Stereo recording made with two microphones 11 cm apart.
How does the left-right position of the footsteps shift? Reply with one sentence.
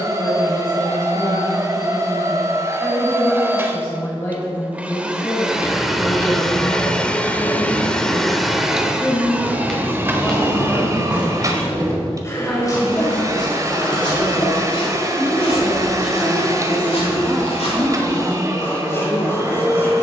You can hear the footsteps go from the right side to the left.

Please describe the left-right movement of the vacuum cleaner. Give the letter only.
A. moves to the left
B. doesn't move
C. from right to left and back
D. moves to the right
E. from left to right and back
C.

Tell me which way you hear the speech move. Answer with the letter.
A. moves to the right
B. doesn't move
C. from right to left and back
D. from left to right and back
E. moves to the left
A.